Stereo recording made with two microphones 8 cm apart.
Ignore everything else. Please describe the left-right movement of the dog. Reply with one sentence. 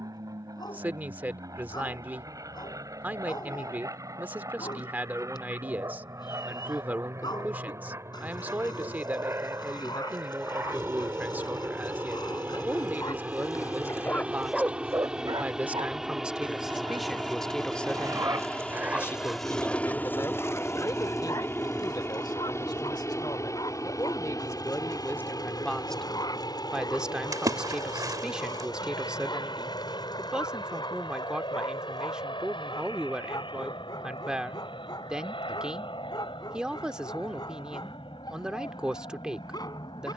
In this clip you hear the dog go right and come back.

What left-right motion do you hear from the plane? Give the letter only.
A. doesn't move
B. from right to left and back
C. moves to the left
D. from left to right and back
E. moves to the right
C.